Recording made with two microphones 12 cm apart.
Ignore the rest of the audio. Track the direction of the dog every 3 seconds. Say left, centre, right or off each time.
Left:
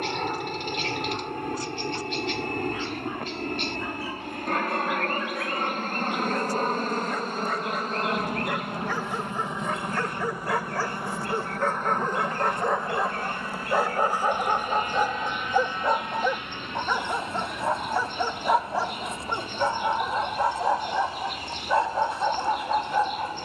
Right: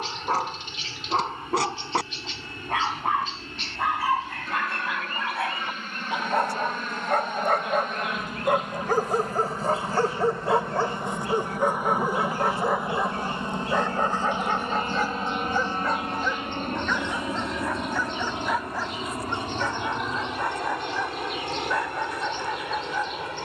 right, right, right, right, centre, left, left, left.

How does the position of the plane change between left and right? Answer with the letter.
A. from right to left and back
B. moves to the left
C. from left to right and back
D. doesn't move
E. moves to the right
E.